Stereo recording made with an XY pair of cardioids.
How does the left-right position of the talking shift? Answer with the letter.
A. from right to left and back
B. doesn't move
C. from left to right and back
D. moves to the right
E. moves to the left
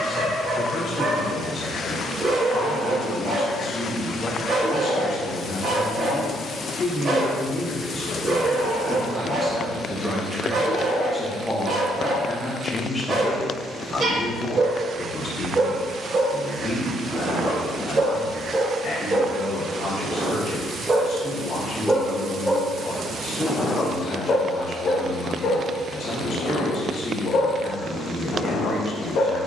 C.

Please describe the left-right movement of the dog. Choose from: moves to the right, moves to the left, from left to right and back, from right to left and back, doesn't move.
moves to the left.